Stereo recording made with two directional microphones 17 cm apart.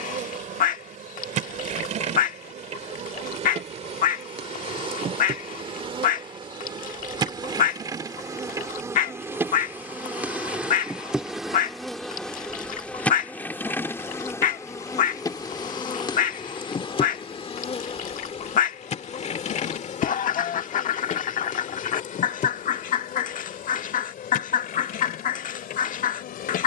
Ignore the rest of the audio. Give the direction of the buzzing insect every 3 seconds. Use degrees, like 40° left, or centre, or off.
50° right, 40° right, 20° right, 10° right, 10° left, 30° left, 40° left, 50° left, 60° left.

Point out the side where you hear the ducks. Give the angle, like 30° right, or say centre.
50° left.